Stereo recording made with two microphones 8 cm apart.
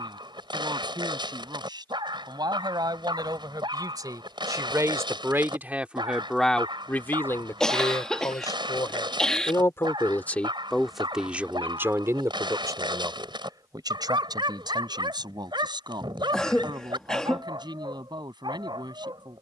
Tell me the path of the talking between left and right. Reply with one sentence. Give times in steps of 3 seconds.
In this clip you hear the talking on the right from 0 s, on the left from 6 s, in the centre from 9 s and on the right from 12 s.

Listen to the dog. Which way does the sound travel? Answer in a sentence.
You can hear the dog stay in one place.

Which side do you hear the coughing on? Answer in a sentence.
You can hear the coughing in the centre.